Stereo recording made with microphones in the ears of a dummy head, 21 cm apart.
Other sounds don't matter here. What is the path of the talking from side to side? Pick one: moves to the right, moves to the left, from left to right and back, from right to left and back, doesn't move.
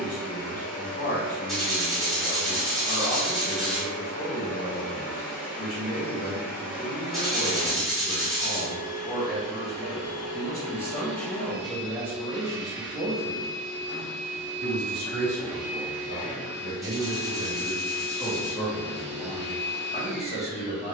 from left to right and back.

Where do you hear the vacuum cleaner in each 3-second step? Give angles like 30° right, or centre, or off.
40° left, 40° left, 40° left, 20° left, centre, 20° left, 30° left.